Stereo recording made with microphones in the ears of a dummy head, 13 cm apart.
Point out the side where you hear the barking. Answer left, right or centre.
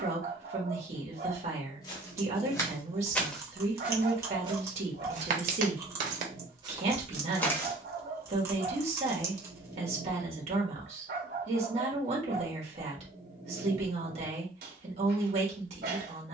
right.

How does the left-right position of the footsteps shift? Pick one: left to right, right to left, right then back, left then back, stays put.
right then back.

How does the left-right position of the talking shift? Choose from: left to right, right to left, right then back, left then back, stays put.
stays put.